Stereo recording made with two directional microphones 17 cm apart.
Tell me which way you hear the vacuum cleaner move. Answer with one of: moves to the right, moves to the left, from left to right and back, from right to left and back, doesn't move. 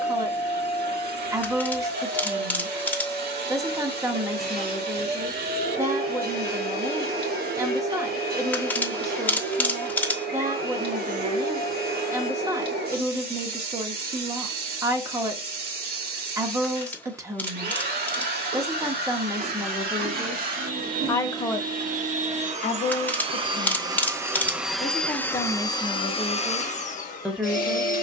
moves to the left.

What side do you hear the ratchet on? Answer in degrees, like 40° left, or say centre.
10° left.